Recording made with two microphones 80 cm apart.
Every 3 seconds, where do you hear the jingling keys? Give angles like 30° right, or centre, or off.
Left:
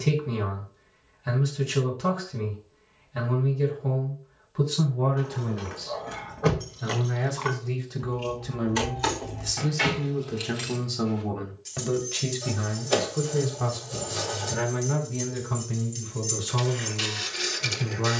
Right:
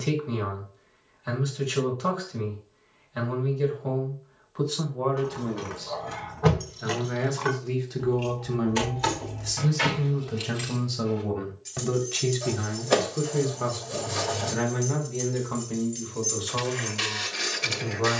off, 40° right, 30° right, centre, 30° left, 40° left.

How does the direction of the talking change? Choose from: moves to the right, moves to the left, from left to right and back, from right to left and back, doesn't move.
from left to right and back.